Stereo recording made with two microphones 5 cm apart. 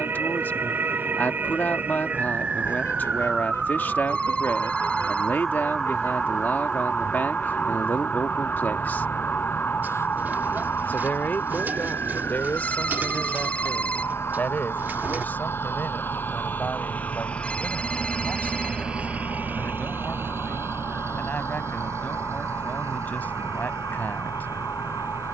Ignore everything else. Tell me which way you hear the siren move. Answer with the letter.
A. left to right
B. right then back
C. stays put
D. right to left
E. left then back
D.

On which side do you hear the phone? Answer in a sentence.
You can hear the phone on the left.